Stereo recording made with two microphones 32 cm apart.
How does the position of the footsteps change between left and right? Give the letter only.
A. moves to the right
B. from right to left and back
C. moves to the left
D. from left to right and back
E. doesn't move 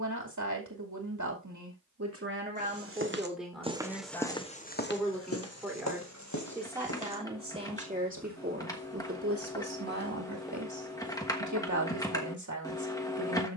B.